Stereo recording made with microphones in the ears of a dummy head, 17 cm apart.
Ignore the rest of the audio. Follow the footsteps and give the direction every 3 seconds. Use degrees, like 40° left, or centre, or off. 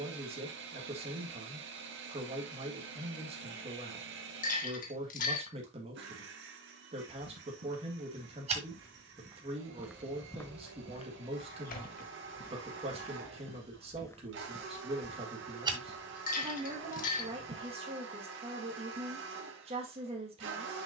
off, off, 40° right, 20° left, 30° left, 40° right, off.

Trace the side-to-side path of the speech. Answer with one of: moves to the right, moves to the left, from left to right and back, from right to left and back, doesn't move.
doesn't move.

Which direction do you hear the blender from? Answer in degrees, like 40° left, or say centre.
70° right.